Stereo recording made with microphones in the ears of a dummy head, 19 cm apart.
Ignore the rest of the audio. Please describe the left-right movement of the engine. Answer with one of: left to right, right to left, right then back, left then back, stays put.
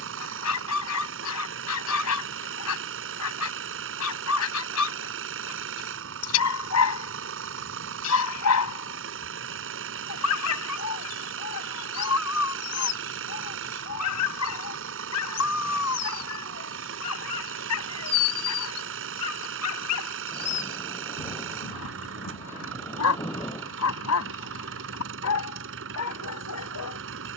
stays put.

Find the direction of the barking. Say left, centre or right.
left.